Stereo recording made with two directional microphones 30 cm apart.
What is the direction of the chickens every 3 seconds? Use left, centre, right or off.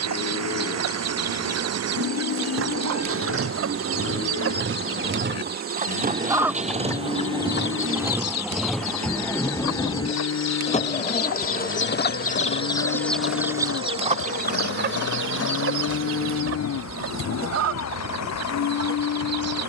right, right, left, left, centre, right, right.